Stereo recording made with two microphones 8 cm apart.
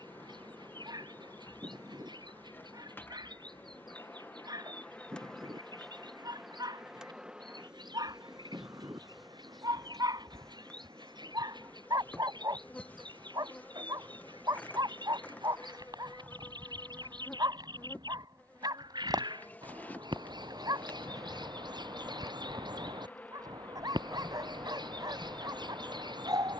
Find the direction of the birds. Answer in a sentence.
In this clip you hear the birds on the right.